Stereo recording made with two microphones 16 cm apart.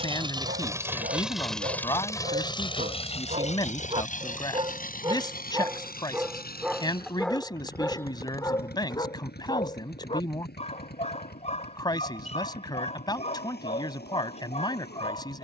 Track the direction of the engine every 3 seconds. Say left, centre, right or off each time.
centre, left, left, left, left.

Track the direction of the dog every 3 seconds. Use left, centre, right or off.
right, right, centre, left, left.